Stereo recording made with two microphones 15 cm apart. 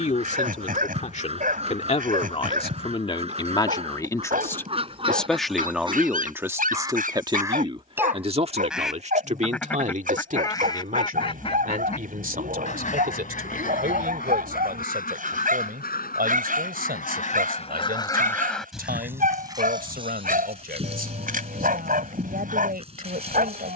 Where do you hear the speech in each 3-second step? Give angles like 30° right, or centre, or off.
50° left, 20° left, 30° right, 60° right, 70° right, 70° right, 70° right, 70° right.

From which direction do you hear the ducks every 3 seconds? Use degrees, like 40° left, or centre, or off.
40° right, 40° right, 20° right, 20° left, 60° left, 60° left, 20° right, 40° right.